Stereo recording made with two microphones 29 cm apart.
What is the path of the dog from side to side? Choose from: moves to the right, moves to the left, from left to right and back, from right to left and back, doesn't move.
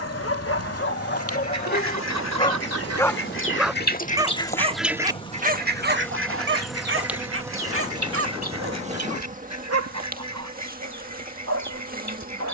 moves to the right.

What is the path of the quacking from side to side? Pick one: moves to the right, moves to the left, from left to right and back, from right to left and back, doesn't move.
moves to the right.